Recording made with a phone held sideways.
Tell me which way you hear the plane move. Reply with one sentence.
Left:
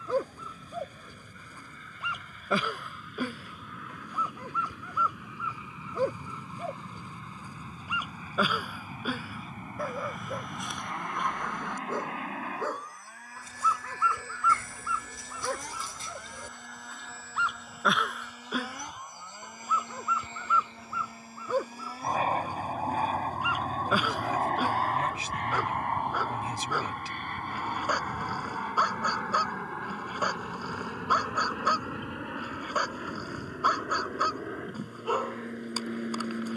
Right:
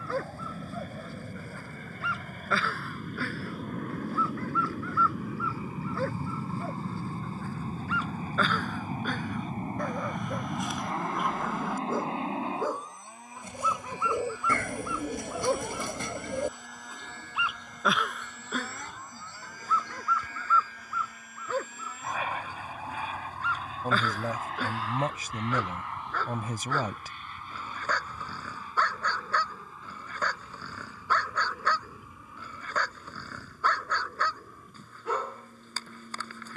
You can hear the plane go from the right side to the left.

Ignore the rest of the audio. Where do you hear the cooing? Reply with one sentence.
You can hear the cooing on the right.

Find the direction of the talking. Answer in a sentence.
You can hear the talking on the right.